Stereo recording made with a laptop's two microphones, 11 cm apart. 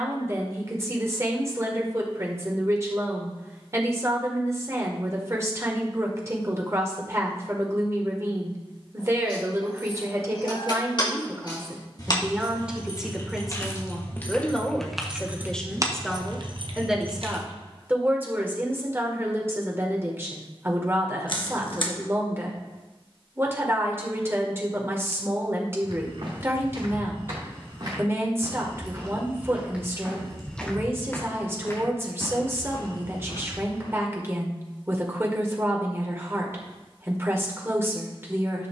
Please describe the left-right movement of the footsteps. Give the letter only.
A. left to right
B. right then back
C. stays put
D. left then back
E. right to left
E.